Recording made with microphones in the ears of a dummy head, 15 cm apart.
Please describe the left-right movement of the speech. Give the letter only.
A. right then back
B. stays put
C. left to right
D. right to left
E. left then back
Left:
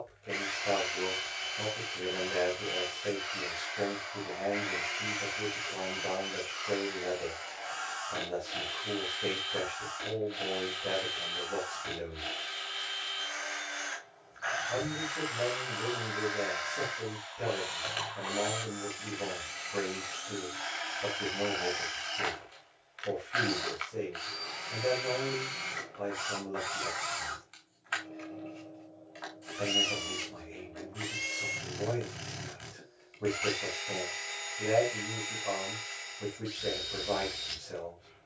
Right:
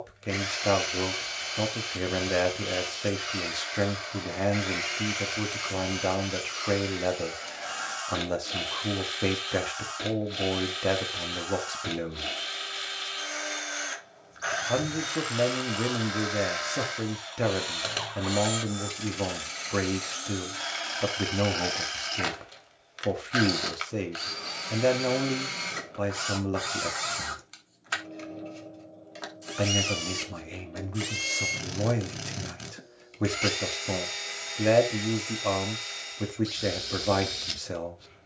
B.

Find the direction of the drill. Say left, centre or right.
right.